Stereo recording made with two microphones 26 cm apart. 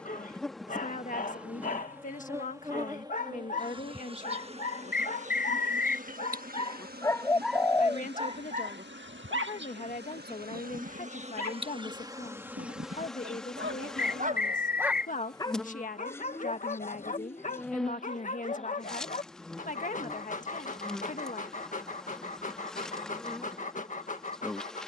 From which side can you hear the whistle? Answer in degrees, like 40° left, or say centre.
40° left.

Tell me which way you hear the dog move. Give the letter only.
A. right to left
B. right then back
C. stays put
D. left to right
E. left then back
B.